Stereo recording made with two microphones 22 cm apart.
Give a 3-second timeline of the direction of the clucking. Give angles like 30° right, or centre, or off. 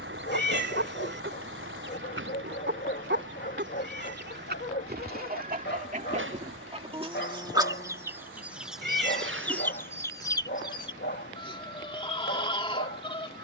60° right, 50° right, 20° right, 20° left, 20° left.